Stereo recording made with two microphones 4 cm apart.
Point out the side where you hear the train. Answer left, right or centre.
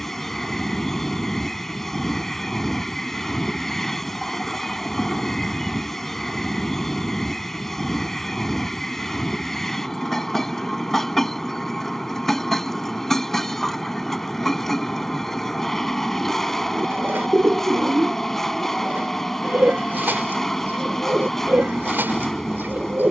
centre.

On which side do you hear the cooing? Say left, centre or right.
right.